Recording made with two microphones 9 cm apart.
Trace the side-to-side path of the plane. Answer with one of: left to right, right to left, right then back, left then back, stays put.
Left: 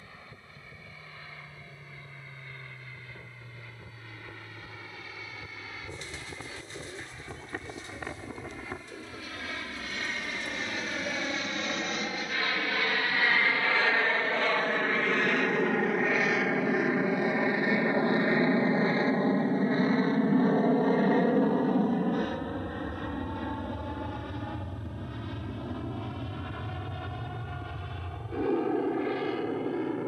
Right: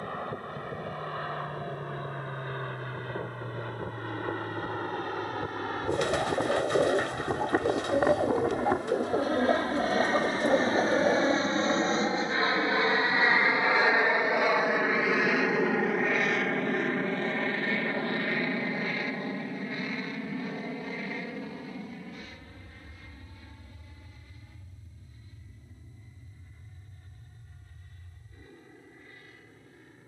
right to left.